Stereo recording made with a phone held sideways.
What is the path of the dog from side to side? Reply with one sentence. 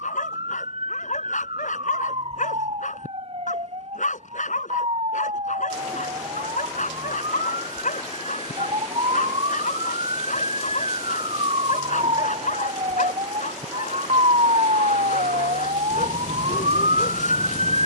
In this clip you hear the dog stay put.